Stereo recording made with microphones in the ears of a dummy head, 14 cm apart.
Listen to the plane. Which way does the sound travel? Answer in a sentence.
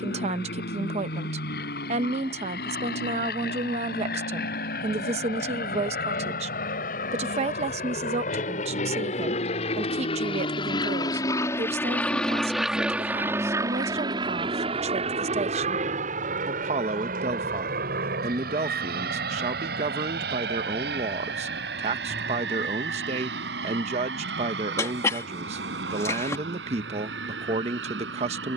You can hear the plane go from the left side to the right.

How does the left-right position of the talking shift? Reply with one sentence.
You can hear the talking stay in one place.